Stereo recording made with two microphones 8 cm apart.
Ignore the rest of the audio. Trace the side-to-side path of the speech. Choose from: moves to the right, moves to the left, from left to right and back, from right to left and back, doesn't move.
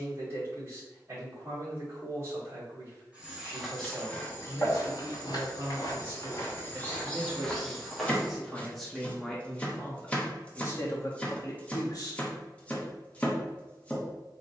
moves to the left.